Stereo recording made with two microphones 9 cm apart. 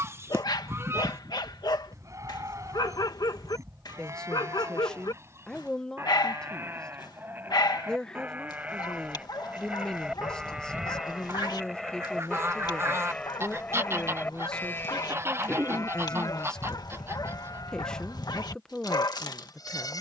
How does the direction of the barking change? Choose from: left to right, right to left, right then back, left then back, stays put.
stays put.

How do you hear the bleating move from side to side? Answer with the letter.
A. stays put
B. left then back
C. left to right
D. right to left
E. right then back
D.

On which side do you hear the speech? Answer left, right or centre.
centre.